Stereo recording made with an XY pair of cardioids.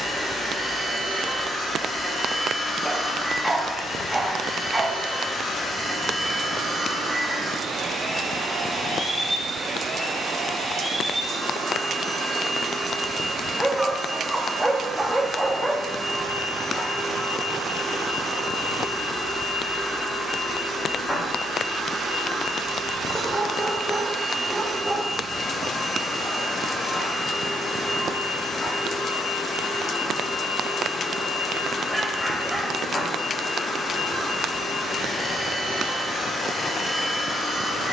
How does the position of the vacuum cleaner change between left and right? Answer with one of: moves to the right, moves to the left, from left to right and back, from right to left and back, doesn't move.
doesn't move.